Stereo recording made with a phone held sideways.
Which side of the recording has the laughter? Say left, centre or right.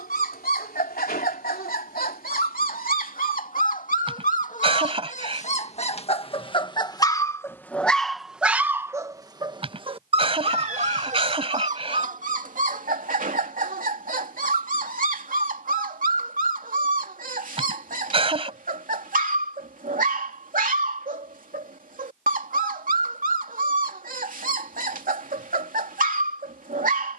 right.